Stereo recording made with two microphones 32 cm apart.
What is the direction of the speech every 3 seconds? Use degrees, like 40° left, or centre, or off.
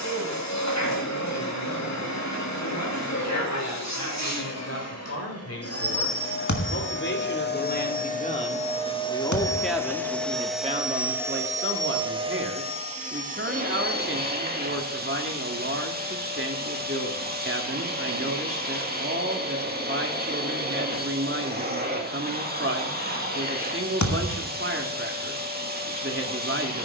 60° left, 50° left, 30° left, 20° right, 40° right, 40° right, 40° right, 40° right, 40° right.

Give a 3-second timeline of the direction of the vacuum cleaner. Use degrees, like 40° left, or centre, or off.
60° left, 50° left, 30° left, centre, 20° right, 30° right, 30° right, 30° right, 30° right.